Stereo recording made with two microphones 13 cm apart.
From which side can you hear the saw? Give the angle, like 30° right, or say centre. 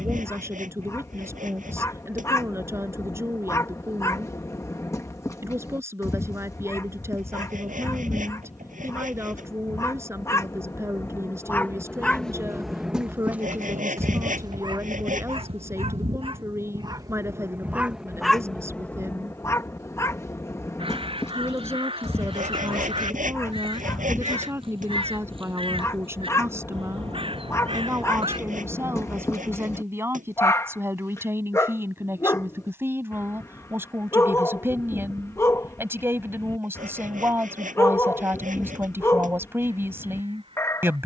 90° right.